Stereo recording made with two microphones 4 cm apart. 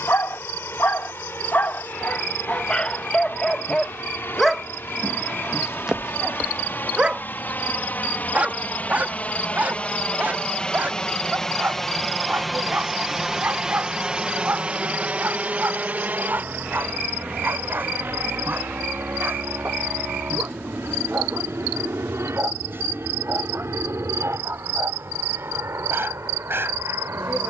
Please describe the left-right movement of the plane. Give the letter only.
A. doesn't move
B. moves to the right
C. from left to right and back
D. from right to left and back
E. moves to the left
B.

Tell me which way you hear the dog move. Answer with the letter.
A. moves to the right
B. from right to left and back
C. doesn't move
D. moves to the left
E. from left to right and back
A.